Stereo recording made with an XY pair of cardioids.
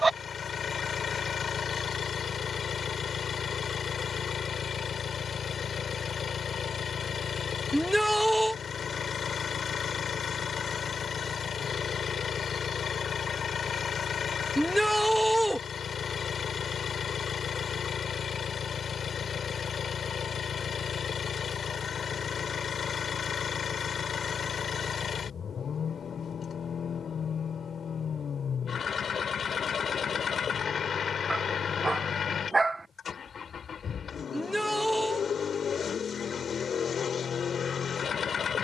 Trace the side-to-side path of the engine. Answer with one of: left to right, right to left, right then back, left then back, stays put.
stays put.